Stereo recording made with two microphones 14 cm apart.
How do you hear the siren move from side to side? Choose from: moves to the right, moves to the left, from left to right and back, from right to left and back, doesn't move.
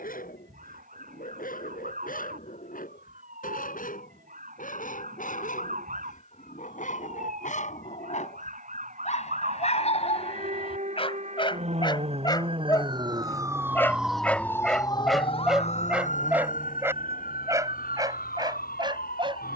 moves to the left.